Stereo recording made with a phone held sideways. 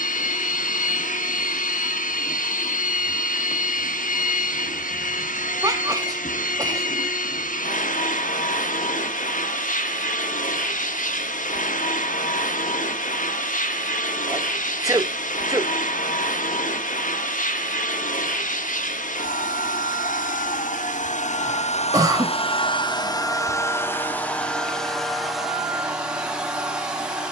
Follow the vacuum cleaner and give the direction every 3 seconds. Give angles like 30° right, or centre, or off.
80° left, 80° left, 80° left, 80° left, 80° left, 80° left, 80° left, 40° left, centre.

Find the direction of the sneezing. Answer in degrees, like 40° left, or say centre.
30° right.